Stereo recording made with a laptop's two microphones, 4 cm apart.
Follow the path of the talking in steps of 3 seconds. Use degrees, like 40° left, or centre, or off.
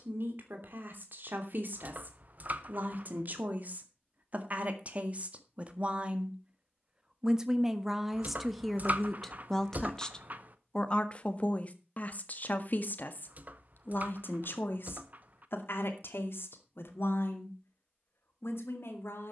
50° right, 40° right, 10° right, 20° left, 50° left, 70° left, 70° left.